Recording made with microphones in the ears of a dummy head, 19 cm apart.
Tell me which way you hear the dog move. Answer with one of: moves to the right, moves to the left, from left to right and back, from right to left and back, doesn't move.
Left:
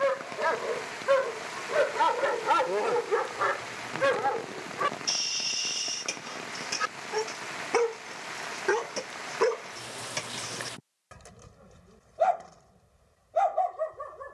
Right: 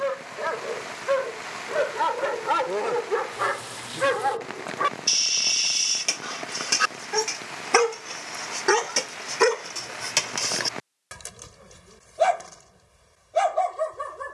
moves to the right.